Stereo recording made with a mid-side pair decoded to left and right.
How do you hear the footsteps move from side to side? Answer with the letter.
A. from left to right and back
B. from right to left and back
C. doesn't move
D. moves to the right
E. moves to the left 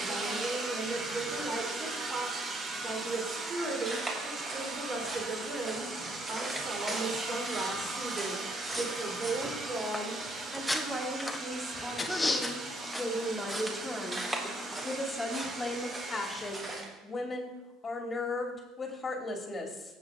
B.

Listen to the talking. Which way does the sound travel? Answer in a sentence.
You can hear the talking go from the right side to the left.